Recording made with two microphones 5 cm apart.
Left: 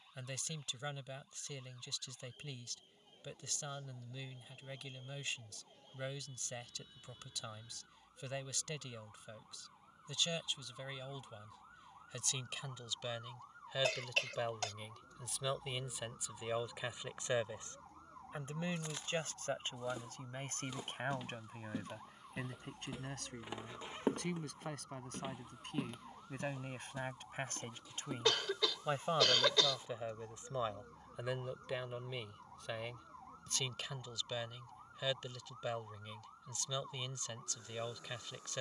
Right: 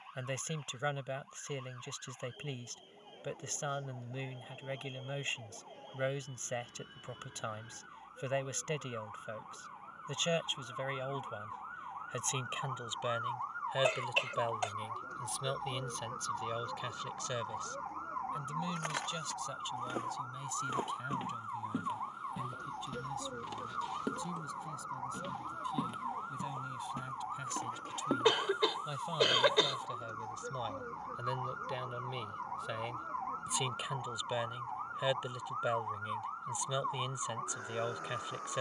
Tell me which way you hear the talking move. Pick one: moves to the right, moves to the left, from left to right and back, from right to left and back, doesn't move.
from right to left and back.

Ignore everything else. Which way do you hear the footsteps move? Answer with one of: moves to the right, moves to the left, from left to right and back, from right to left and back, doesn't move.
from right to left and back.